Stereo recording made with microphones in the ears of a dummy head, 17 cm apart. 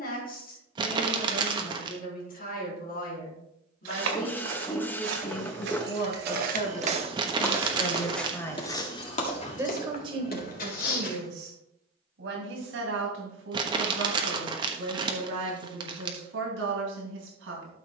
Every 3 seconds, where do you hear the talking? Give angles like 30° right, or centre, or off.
50° left, 50° left, 30° left, 40° right, 70° right, 70° right.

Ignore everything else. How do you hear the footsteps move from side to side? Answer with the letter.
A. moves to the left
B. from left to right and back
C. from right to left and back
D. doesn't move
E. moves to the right
A.